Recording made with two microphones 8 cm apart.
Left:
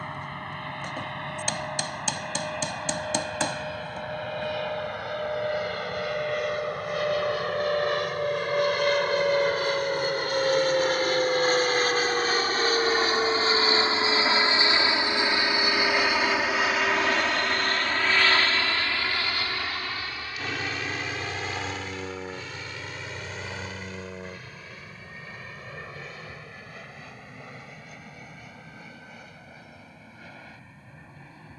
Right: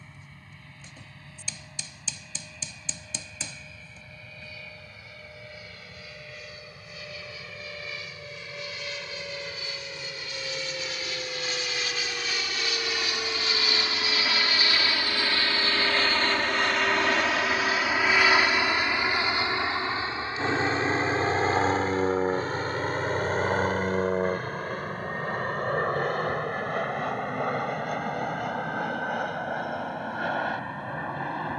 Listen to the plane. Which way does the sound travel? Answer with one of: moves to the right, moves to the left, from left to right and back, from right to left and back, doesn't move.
moves to the right.